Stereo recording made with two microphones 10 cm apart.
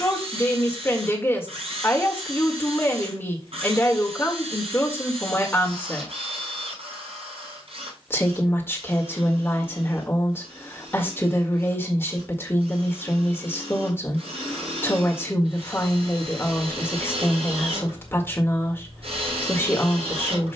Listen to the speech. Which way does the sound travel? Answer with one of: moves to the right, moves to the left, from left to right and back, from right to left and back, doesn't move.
doesn't move.